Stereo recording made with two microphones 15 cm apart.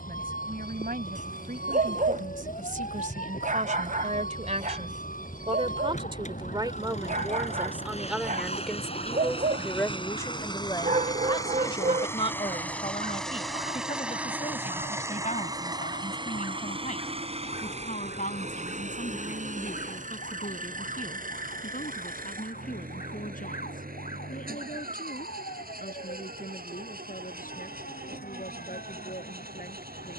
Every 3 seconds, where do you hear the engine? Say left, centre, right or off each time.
left, left, left, left, centre, right, right, right, right, right.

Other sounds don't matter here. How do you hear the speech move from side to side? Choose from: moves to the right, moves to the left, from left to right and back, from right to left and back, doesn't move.
moves to the left.